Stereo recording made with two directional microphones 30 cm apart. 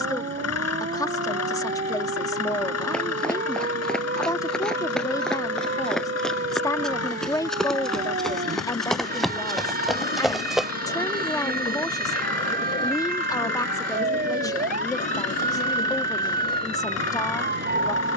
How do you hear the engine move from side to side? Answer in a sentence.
You can hear the engine stay in one place.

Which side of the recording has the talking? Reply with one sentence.
In this clip you hear the talking in the centre.